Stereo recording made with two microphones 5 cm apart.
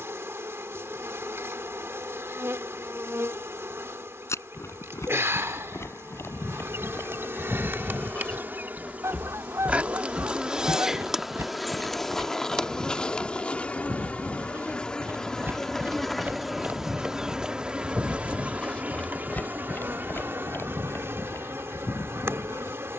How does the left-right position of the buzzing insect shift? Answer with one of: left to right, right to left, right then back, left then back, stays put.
left then back.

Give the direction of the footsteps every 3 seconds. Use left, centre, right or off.
off, left, left, right, right, right, left, left.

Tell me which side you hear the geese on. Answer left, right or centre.
right.